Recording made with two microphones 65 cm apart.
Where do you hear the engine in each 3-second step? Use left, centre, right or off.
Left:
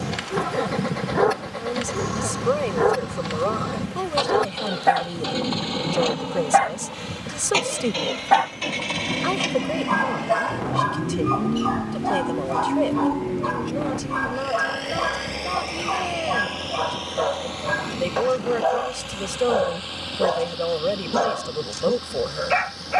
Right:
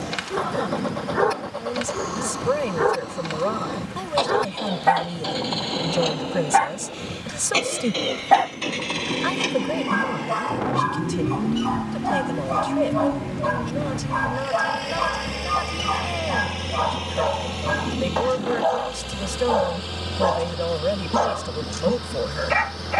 left, left, left, centre, right, right, right, right.